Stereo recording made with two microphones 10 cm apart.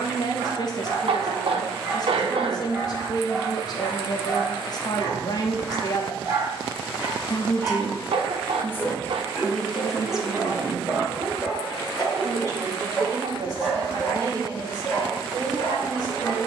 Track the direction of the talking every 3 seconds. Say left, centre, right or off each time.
left, left, left, centre, right, right.